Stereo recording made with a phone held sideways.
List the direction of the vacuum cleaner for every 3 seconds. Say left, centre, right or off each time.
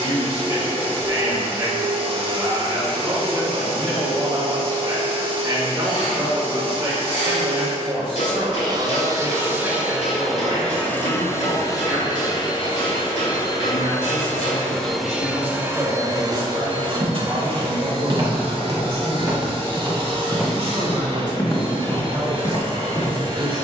right, right, right, centre, left, right, right, right.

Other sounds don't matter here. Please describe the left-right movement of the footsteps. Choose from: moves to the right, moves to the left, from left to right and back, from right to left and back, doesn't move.
moves to the left.